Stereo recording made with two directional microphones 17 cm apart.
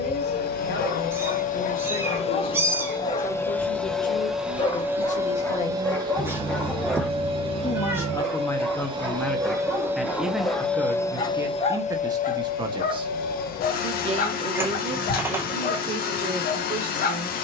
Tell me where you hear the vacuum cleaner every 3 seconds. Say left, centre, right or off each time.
left, centre, right, centre, left, left.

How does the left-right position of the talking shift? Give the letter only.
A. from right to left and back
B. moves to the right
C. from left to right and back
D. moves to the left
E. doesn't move
B.